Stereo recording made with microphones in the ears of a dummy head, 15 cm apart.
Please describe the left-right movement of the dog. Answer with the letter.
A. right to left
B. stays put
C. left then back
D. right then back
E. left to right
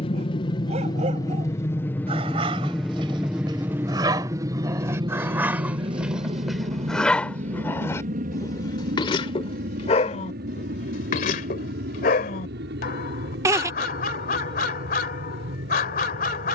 A.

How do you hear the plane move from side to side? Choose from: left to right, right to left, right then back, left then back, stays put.
left to right.